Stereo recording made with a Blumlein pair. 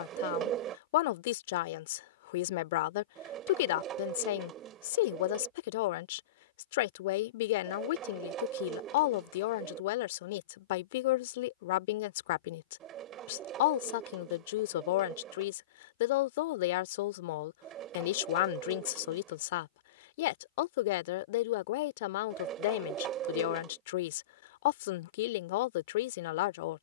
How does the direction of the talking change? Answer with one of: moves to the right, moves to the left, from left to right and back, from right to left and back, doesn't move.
doesn't move.